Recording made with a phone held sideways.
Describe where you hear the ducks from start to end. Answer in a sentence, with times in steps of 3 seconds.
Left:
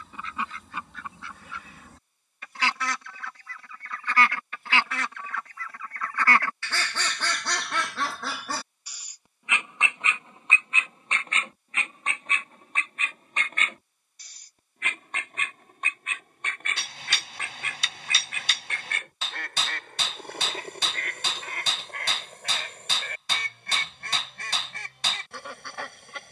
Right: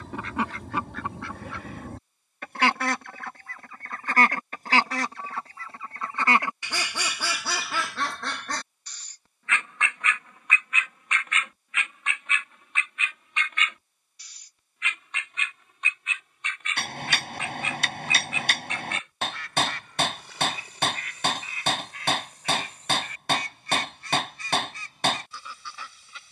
In this clip you hear the ducks on the right from 0 s, in the centre from 6 s and on the left from 9 s.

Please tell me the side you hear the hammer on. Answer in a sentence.
In this clip you hear the hammer on the right.